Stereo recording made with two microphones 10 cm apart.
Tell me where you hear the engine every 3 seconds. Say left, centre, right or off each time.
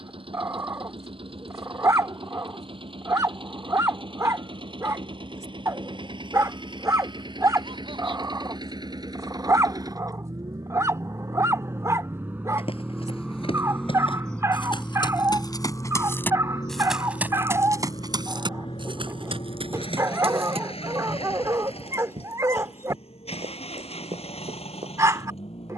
right, right, right, right, centre, left, left, left, left.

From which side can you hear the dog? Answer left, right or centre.
right.